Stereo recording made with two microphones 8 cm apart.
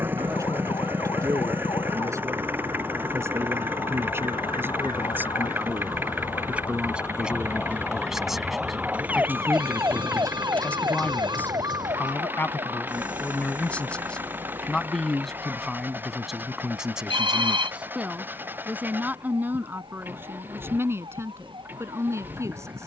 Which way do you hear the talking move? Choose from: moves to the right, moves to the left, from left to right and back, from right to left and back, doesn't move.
from right to left and back.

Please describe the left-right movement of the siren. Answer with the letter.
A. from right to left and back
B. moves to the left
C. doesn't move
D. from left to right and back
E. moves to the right
E.